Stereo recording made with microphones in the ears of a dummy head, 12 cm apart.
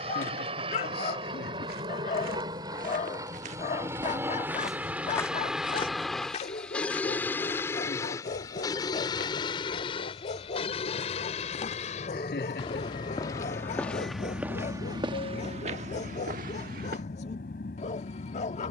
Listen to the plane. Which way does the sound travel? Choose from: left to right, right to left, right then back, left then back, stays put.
right to left.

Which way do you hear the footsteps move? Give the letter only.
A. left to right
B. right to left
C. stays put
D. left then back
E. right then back
D.